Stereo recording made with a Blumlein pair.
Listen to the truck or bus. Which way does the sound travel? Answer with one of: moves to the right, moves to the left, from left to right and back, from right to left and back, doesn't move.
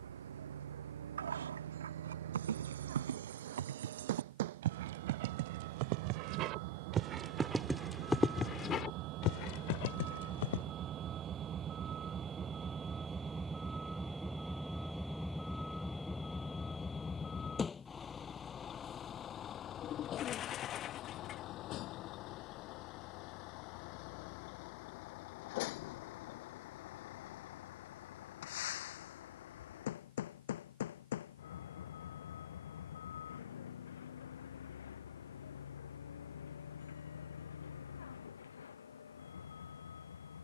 moves to the left.